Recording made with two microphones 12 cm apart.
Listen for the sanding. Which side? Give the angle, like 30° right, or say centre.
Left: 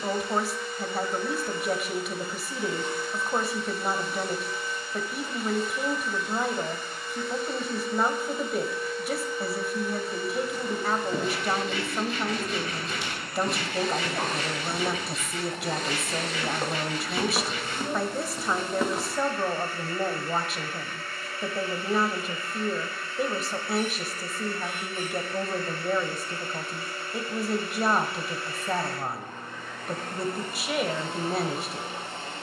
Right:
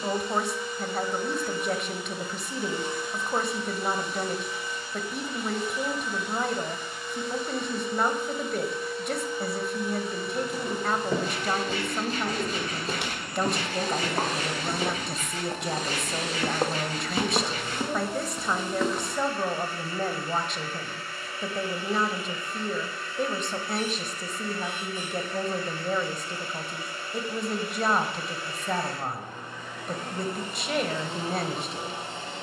40° right.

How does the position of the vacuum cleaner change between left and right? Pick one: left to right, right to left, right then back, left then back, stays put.
stays put.